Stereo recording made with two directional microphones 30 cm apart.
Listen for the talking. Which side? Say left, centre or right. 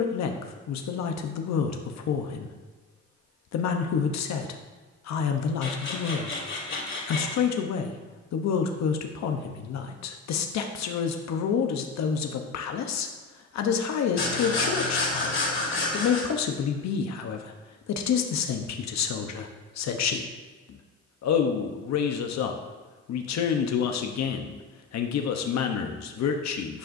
left.